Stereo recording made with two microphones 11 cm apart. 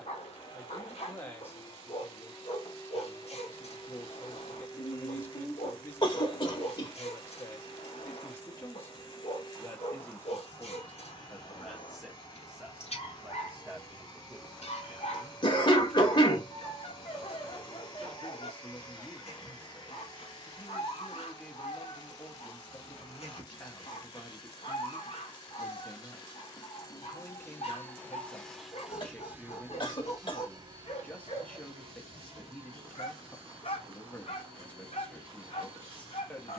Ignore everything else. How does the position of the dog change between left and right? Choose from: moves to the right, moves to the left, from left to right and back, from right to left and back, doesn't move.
doesn't move.